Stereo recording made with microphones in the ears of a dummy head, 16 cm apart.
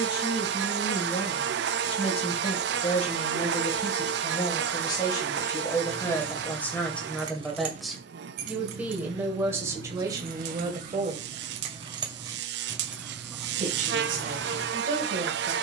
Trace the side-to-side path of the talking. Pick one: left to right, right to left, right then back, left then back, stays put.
left to right.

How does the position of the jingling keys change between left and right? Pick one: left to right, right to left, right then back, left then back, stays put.
right then back.